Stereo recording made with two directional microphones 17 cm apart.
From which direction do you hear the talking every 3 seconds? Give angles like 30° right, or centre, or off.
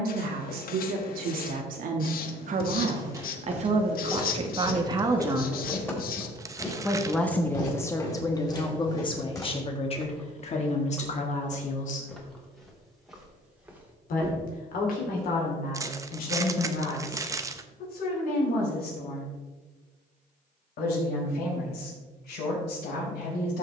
60° right, 30° right, 20° left, 40° left, 60° left, 60° left, 60° left, 70° left.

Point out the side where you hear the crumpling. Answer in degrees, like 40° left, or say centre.
20° right.